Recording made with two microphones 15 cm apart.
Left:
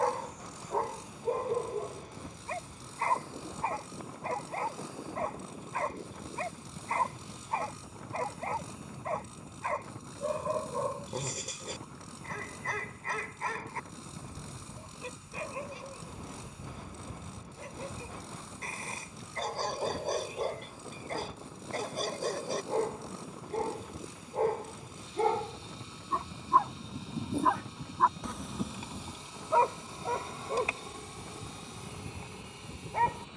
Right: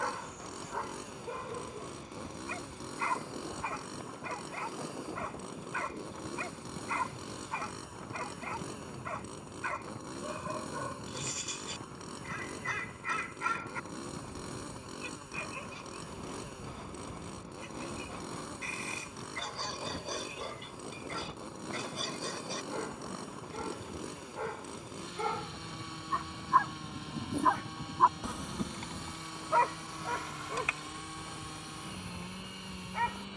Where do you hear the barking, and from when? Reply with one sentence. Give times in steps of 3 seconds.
You can hear the barking on the left from 0 s, in the centre from 27 s and on the left from 30 s.